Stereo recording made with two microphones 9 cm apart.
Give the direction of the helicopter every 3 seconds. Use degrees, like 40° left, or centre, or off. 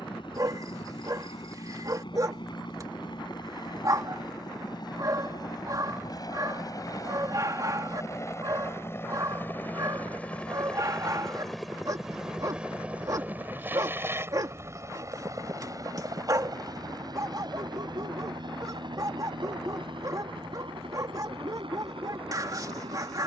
60° left, 50° left, 40° left, 10° left, 20° right, 40° right, 50° right, 60° right.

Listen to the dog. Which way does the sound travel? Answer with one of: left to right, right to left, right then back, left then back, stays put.
stays put.